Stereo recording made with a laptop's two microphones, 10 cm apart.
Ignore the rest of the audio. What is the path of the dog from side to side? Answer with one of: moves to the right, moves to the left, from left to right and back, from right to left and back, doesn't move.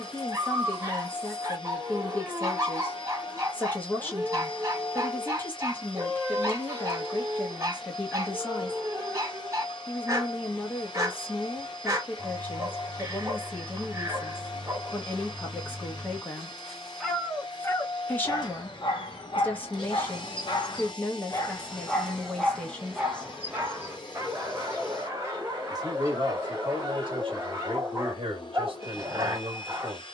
from right to left and back.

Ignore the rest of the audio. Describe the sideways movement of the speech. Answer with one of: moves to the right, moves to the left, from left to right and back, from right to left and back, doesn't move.
moves to the right.